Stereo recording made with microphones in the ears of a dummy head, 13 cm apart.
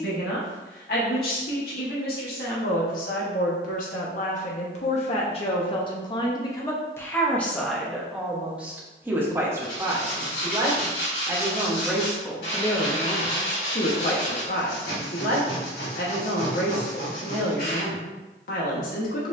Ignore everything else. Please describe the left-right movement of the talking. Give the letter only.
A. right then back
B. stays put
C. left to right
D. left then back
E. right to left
A.